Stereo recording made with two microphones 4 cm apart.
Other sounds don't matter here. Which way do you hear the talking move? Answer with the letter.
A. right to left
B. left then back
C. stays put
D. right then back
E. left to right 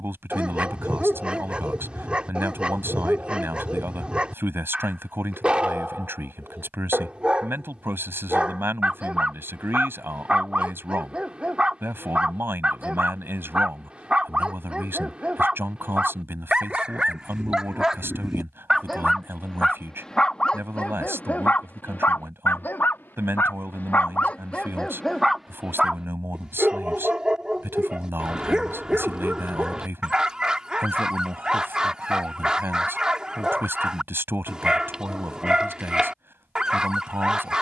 C.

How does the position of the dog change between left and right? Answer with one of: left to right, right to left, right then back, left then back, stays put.
left then back.